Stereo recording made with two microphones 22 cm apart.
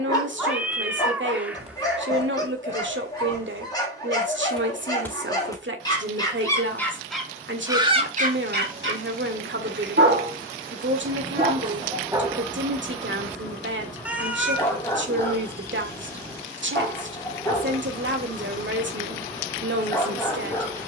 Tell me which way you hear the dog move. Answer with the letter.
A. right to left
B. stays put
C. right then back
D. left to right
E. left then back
C.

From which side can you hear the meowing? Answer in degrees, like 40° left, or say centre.
10° right.